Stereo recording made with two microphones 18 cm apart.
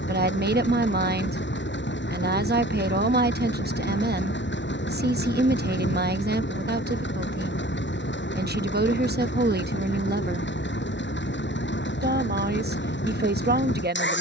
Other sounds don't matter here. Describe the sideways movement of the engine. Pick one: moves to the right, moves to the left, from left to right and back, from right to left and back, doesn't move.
doesn't move.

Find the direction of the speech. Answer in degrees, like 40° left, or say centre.
60° right.